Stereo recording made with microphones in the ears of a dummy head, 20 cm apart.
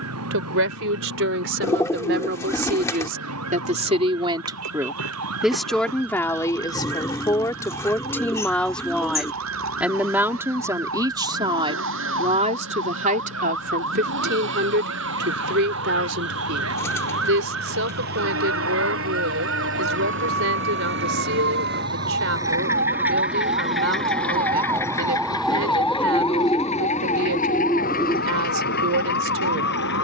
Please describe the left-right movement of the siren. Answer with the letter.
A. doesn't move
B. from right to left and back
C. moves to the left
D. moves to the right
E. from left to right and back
C.